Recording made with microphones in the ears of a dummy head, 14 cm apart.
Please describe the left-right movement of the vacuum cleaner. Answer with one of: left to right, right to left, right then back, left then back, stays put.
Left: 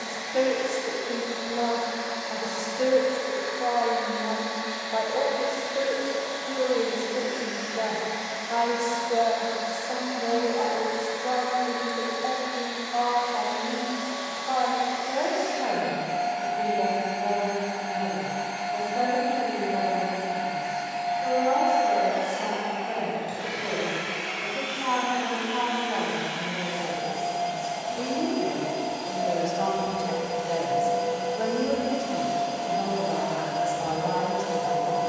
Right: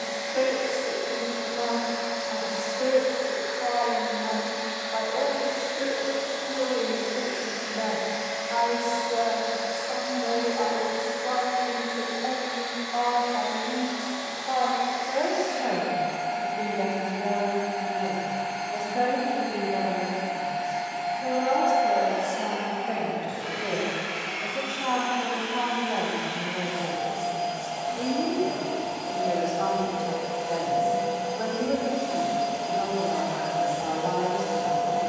left then back.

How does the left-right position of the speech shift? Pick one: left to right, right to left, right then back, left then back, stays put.
right then back.